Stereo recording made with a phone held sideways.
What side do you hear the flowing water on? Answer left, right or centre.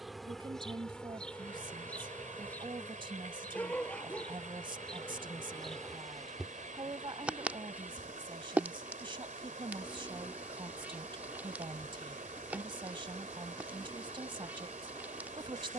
right.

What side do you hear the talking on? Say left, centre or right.
right.